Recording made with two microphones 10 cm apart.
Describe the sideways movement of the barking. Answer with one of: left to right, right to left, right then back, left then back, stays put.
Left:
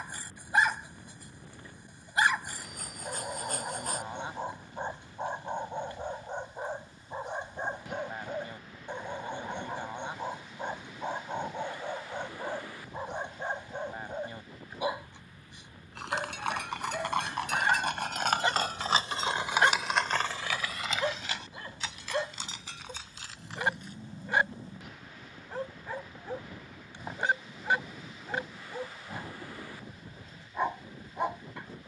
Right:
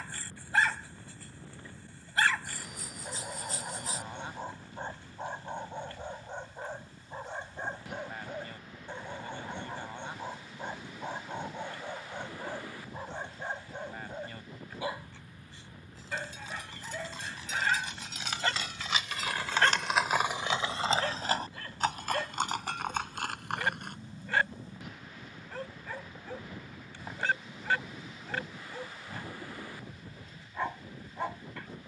stays put.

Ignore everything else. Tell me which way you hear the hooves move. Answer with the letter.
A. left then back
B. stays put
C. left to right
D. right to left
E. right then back
C.